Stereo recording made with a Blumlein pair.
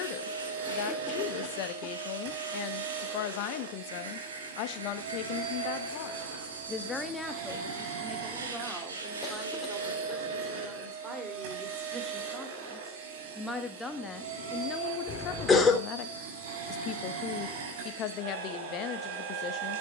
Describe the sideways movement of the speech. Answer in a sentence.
You can hear the speech move from left to right and back again.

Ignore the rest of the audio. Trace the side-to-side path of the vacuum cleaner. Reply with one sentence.
You can hear the vacuum cleaner stay in one place.